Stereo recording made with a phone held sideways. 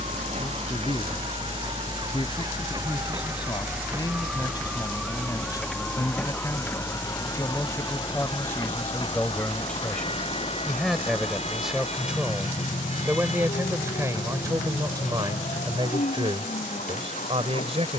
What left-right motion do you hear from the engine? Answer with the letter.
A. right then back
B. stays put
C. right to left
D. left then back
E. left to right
C.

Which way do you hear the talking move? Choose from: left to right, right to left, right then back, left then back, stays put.
left to right.